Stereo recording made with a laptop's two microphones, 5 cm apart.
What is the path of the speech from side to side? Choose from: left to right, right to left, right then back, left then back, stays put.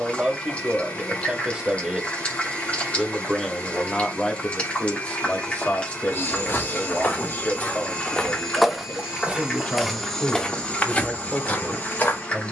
left then back.